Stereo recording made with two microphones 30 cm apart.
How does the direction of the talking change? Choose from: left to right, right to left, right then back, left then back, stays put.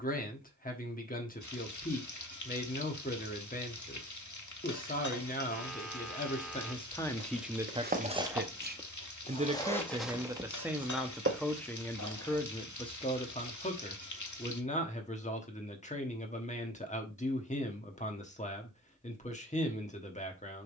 right then back.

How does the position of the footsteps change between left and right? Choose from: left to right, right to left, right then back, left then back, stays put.
left then back.